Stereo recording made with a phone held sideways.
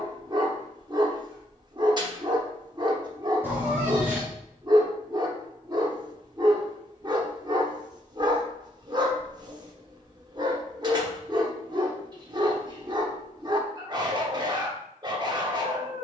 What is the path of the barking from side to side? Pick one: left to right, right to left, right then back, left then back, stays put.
stays put.